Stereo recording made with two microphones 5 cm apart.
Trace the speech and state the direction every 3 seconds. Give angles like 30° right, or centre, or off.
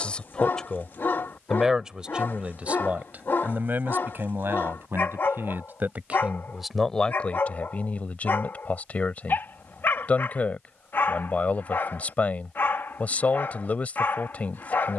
10° right, 50° right, 20° left, 30° left, 30° left.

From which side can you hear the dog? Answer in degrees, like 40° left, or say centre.
50° left.